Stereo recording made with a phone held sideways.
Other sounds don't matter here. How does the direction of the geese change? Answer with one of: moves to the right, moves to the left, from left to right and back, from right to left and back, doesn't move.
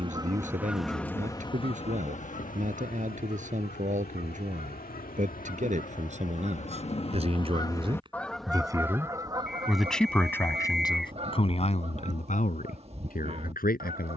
from right to left and back.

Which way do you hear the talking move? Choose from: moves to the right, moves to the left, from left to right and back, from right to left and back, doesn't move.
moves to the left.